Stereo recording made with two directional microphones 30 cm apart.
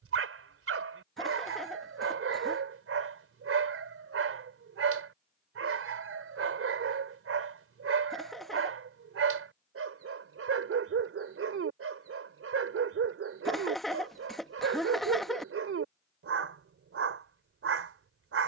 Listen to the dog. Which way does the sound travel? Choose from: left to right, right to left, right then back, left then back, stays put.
stays put.